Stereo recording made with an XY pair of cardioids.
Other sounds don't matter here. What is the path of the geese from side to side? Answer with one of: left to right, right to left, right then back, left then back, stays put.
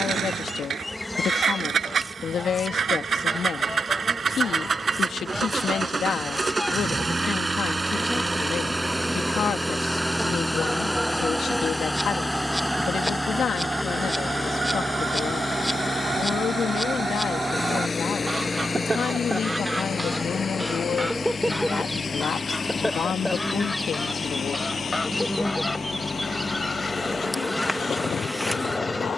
right then back.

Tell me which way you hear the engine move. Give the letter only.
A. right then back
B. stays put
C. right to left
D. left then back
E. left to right
C.